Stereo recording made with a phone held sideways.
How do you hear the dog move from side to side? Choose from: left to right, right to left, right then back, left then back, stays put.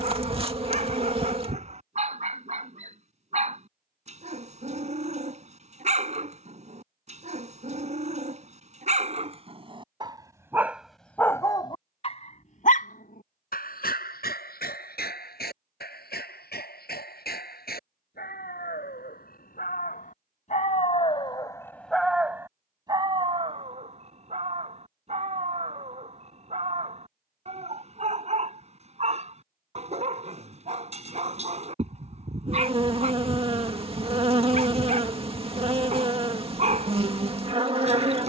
left then back.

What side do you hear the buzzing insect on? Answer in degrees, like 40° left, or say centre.
40° right.